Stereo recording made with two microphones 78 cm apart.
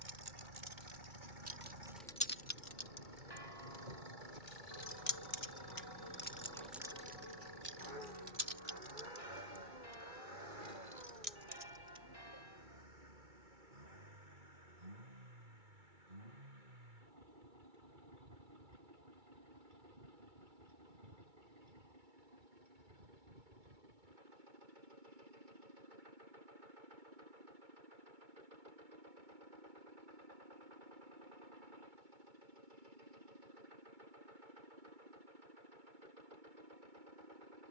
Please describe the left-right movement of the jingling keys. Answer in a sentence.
You can hear the jingling keys go left and come back.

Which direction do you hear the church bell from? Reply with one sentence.
You can hear the church bell on the left.